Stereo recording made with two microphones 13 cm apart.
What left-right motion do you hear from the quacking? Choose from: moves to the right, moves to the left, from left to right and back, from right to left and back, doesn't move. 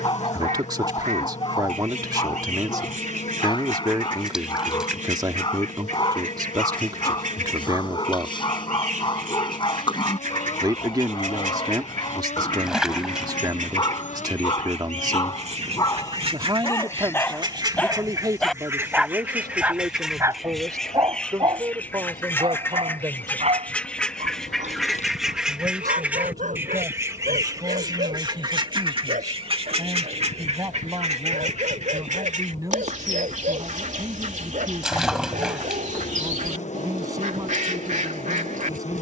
from right to left and back.